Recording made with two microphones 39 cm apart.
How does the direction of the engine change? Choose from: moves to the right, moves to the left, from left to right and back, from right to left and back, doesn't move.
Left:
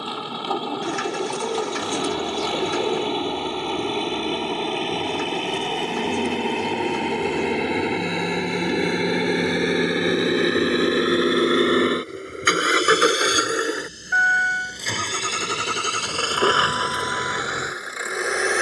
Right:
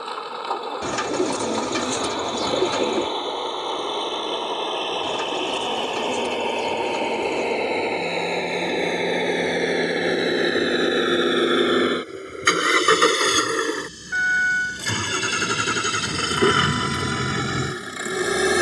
moves to the right.